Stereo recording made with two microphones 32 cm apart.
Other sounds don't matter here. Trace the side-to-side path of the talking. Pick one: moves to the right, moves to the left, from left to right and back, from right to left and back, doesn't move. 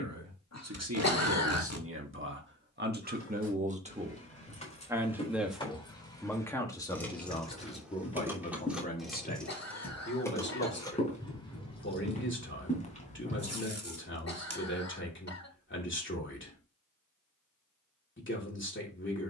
moves to the left.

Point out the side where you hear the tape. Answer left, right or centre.
right.